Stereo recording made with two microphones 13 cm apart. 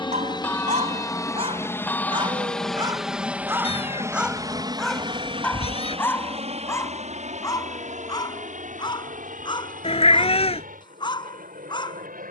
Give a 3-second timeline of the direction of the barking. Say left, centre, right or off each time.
right, centre, left, left.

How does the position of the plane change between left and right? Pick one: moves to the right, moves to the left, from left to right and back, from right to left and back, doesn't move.
moves to the right.